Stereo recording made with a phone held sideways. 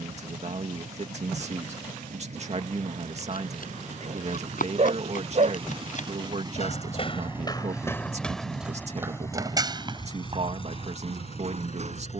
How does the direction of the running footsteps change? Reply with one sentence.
You can hear the running footsteps move from left to right.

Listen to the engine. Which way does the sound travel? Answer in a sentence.
In this clip you hear the engine travel towards the left.